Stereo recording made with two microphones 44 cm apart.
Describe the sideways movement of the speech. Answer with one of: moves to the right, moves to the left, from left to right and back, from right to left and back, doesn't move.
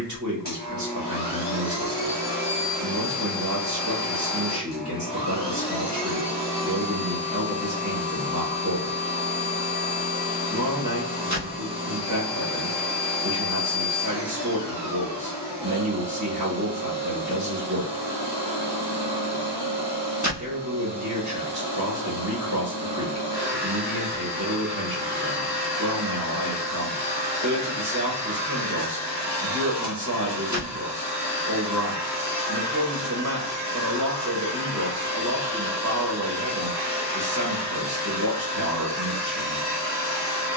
doesn't move.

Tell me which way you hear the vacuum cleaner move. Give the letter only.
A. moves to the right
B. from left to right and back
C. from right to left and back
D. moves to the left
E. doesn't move
E.